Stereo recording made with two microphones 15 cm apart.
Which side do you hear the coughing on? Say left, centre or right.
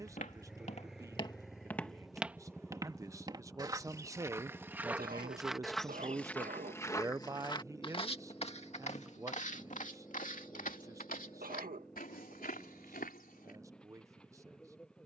right.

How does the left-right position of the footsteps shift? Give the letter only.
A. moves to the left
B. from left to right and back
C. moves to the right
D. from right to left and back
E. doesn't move
B.